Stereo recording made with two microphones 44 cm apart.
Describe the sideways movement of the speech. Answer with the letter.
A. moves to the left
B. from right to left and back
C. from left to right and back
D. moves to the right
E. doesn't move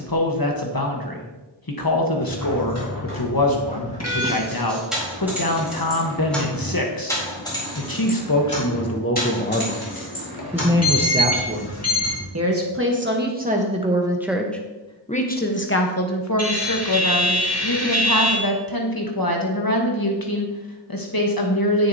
C.